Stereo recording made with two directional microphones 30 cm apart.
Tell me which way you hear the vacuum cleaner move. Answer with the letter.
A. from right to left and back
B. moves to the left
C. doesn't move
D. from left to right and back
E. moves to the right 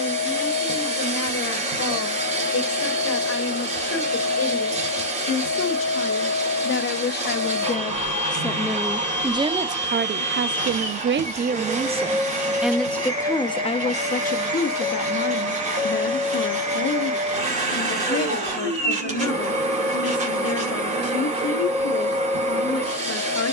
C.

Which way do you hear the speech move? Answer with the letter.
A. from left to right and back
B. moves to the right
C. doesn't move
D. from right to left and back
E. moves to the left
A.